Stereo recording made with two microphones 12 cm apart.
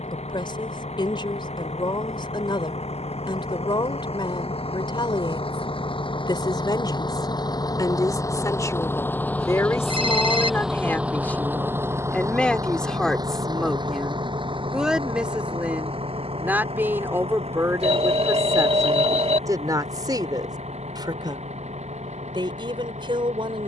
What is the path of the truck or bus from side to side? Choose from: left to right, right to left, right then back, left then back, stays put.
left to right.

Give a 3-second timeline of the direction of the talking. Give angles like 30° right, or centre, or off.
40° left, 40° left, 30° left, 20° left, centre, 20° right, 30° right, 40° right.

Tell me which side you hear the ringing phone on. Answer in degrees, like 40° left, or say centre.
60° right.